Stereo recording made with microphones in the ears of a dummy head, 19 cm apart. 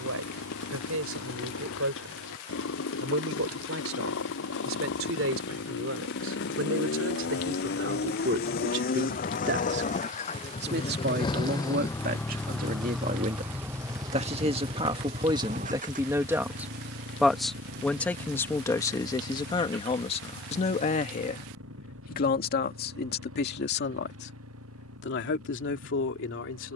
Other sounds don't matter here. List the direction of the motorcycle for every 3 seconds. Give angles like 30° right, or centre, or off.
70° left, 60° left, 50° left, 30° left, 10° right, 40° right, 60° right, 70° right, 80° right.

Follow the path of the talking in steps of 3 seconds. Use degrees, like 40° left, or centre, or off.
70° right, 70° right, 60° right, 50° right, 30° right, 10° right, 20° left, 50° left, 60° left.